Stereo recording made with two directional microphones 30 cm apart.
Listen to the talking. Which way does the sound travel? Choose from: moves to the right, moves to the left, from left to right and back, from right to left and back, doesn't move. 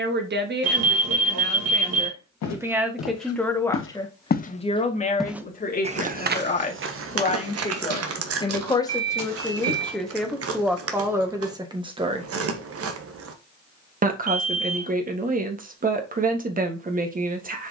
from right to left and back.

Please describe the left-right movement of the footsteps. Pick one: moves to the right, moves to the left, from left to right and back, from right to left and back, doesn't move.
moves to the right.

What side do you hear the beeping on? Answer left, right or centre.
right.